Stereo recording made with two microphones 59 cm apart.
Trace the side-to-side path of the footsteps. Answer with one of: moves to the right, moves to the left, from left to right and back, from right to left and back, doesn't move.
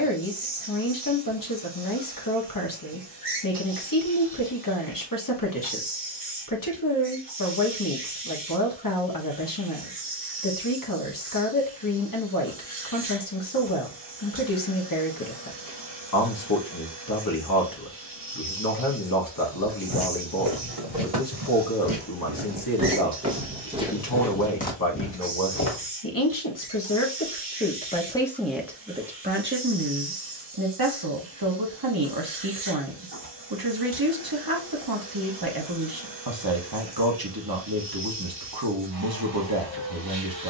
moves to the left.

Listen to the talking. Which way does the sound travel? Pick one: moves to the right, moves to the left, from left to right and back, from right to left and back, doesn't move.
moves to the right.